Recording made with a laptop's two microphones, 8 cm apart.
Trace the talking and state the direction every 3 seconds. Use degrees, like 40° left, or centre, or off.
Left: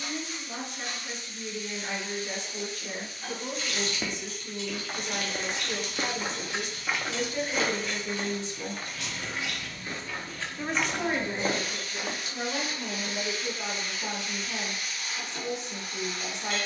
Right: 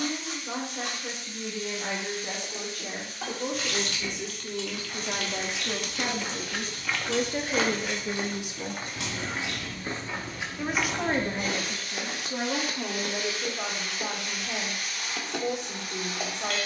70° right, 60° right, 30° right, 30° right, 70° right, 70° right.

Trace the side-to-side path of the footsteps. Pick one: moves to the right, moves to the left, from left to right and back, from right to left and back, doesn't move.
from left to right and back.